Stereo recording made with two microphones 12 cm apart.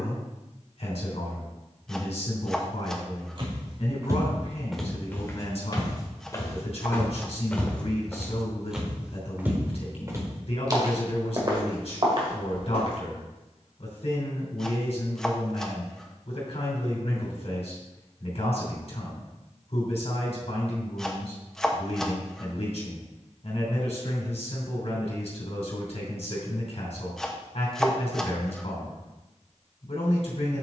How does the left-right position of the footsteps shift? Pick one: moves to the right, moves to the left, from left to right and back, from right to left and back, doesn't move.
from right to left and back.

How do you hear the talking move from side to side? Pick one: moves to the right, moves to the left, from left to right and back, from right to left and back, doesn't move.
doesn't move.